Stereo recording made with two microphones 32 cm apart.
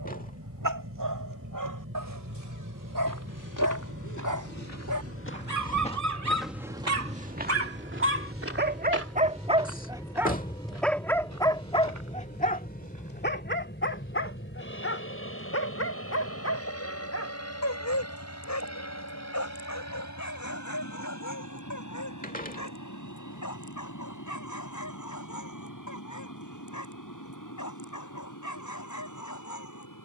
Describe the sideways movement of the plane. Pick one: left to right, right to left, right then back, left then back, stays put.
right to left.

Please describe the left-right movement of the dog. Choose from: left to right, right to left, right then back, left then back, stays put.
right to left.